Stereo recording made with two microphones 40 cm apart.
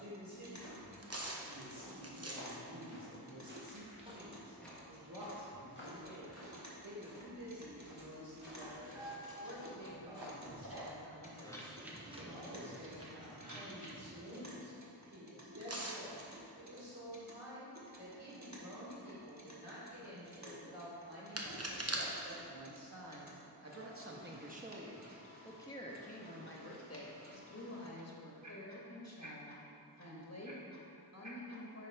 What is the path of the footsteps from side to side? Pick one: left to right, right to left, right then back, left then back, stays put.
right to left.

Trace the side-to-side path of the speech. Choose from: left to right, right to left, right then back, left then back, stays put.
right to left.